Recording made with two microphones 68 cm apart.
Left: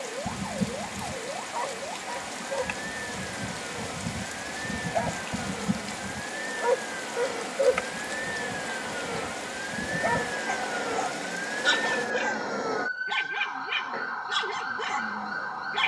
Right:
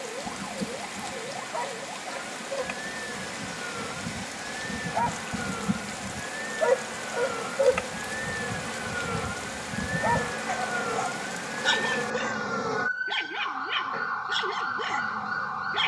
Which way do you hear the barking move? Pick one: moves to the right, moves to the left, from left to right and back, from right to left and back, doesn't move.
from left to right and back.